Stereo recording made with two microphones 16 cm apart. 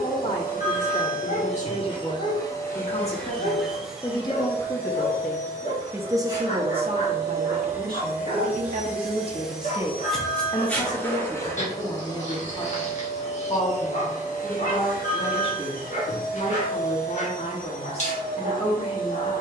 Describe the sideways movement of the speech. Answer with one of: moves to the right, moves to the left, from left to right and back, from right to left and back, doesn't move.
from left to right and back.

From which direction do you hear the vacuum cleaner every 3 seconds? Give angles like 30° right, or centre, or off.
40° left, 10° right, 20° right, 10° left, 40° left, 60° left, 60° left.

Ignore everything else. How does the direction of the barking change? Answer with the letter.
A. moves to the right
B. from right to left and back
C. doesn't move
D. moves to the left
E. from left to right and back
C.